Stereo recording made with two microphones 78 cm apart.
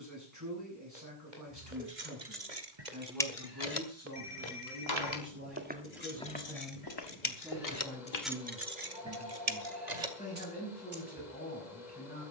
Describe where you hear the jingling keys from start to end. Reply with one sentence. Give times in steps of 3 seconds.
In this clip you hear the jingling keys on the right from 0 s, on the left from 3 s and on the right from 9 s.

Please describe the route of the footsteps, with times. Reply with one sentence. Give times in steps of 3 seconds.
You can hear the footsteps on the right from 0 s, on the left from 6 s and not at all from 9 s.